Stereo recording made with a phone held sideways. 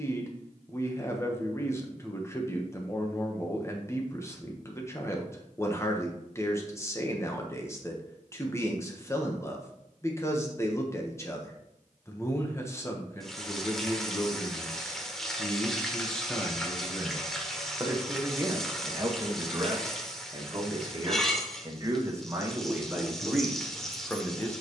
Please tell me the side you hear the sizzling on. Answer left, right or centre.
centre.